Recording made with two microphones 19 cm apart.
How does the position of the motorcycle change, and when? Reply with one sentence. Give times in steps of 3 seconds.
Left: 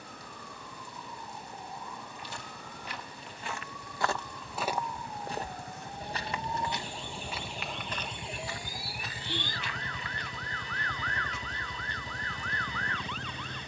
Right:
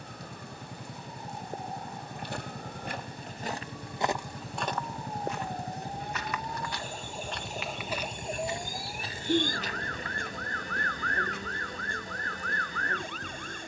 You can hear the motorcycle on the right from 0 s, in the centre from 6 s and on the left from 9 s.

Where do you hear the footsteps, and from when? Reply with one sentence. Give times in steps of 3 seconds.
You can hear the footsteps on the right from 0 s, in the centre from 3 s, on the right from 9 s and not at all from 12 s.